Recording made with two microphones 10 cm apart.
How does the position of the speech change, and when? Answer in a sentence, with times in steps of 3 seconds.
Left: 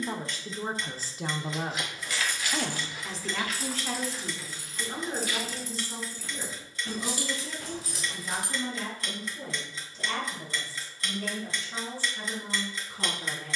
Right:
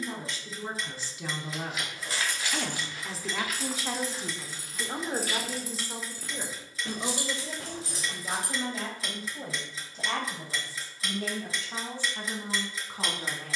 You can hear the speech on the left from 0 s and on the right from 3 s.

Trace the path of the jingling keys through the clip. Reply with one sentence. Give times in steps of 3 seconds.
In this clip you hear the jingling keys on the right from 0 s, in the centre from 3 s, on the right from 6 s and not at all from 9 s.